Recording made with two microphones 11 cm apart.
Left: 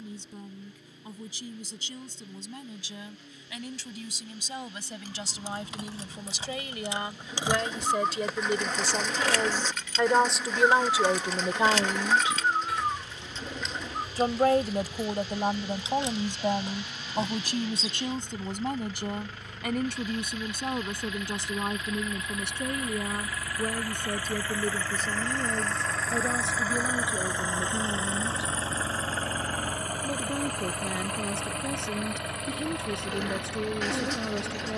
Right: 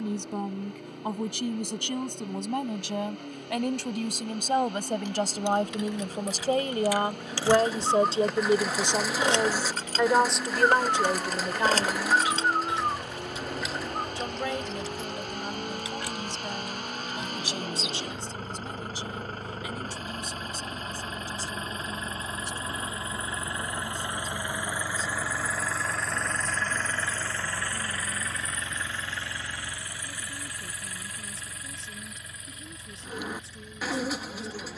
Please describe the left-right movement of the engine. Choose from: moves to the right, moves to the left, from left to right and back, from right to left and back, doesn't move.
moves to the left.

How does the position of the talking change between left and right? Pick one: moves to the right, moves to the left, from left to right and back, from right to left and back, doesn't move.
moves to the left.